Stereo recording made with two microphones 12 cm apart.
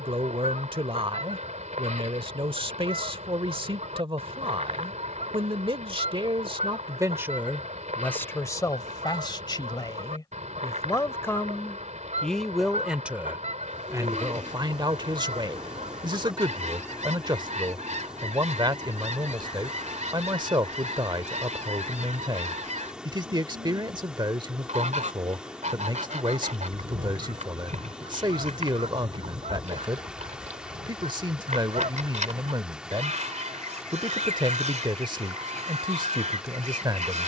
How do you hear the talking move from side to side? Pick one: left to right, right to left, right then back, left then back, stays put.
left then back.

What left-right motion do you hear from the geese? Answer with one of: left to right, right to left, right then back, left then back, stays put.
stays put.